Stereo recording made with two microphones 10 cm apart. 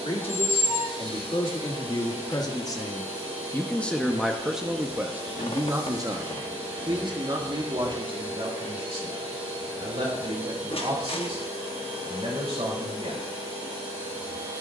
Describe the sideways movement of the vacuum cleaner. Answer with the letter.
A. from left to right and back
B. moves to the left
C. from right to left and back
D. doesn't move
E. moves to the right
D.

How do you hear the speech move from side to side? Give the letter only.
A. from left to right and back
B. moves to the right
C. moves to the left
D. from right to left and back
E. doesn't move
B.